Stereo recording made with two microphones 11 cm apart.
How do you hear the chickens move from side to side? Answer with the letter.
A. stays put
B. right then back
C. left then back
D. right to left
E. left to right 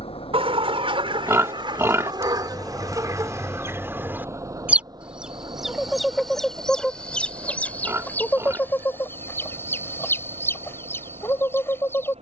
D.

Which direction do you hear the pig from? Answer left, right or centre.
right.